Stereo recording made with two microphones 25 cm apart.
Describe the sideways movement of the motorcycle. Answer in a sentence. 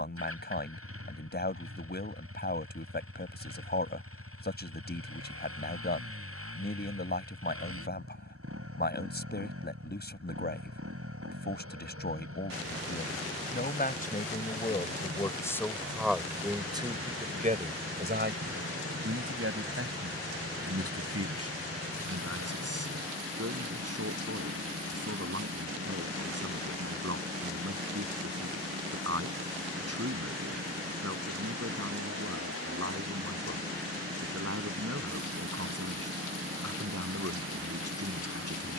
In this clip you hear the motorcycle stay in one place.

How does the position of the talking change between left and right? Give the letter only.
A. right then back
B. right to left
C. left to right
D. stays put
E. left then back
C.